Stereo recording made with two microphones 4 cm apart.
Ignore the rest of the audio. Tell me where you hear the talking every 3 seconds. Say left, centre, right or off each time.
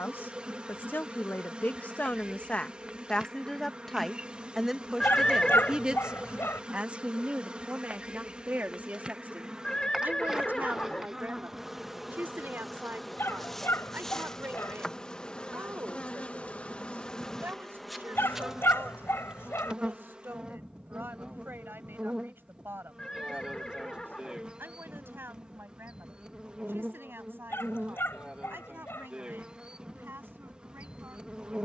left, centre, right, right, right, right, right, right, right, right, right.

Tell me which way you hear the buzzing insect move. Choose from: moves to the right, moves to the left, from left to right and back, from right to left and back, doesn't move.
from right to left and back.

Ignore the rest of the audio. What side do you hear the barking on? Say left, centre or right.
left.